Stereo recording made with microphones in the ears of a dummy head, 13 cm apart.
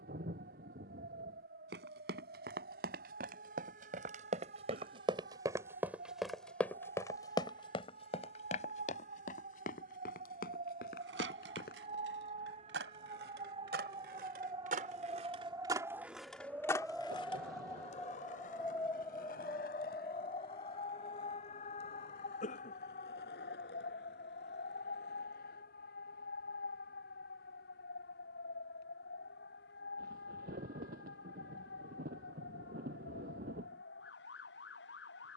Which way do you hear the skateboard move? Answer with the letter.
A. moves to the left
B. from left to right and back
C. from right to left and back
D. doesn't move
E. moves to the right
A.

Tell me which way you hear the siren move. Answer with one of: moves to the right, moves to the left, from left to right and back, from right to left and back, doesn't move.
moves to the left.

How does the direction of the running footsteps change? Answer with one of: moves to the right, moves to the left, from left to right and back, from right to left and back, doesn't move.
moves to the left.